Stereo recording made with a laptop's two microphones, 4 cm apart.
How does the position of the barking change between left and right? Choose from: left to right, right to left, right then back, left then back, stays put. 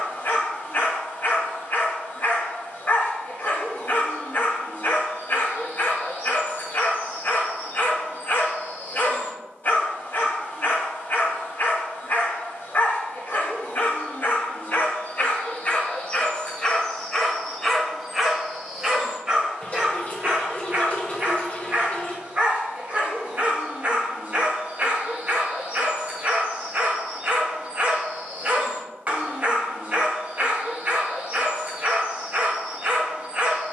left to right.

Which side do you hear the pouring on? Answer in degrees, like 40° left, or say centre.
40° left.